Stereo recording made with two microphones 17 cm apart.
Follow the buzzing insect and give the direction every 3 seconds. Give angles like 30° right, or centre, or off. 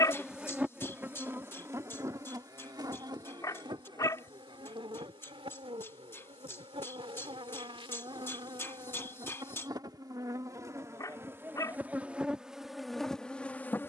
10° right, 30° right, 30° right, 20° right, centre.